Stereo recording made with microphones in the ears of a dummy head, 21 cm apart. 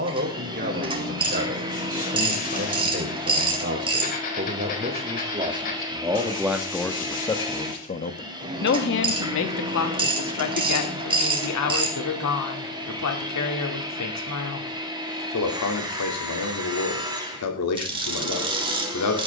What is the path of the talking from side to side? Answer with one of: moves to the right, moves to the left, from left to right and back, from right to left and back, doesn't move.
moves to the left.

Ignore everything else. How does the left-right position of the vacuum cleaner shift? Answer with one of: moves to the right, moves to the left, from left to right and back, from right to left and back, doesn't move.
doesn't move.